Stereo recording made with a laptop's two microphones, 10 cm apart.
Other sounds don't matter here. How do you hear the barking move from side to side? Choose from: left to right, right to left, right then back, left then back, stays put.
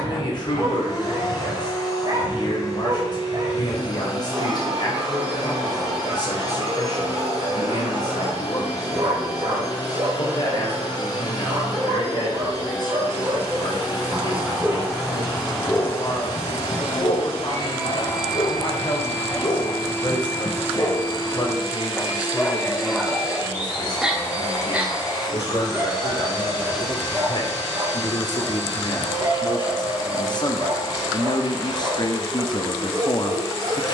left then back.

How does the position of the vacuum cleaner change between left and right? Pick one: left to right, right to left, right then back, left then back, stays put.
stays put.